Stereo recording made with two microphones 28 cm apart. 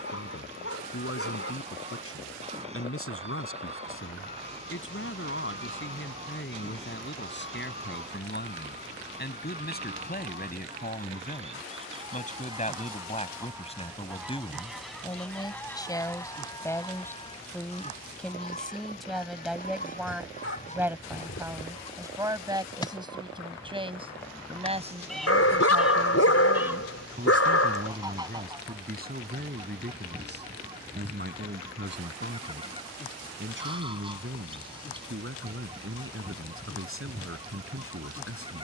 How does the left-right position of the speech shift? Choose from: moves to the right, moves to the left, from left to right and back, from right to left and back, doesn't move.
moves to the right.